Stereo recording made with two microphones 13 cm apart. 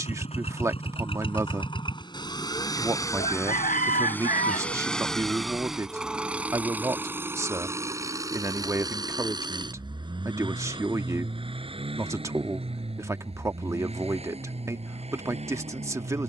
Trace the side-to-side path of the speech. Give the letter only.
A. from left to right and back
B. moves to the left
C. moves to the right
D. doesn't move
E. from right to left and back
D.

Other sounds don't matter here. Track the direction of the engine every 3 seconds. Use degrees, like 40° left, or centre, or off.
40° left, 10° left, 20° right, 40° right, 50° right, 50° right.